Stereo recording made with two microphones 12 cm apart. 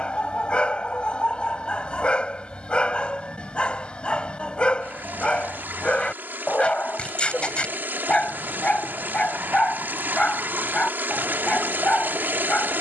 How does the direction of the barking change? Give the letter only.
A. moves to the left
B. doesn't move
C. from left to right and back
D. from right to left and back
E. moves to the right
B.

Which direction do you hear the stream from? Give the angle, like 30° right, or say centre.
20° right.